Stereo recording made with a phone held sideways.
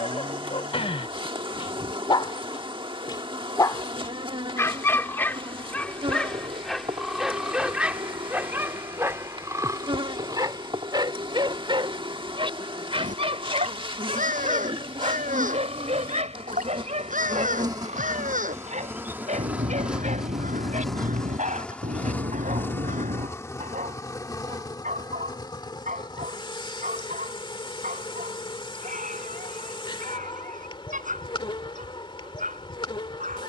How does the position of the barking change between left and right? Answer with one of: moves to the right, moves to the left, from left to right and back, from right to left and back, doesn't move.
moves to the right.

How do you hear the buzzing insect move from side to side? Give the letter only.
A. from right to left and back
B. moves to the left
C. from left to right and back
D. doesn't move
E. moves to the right
B.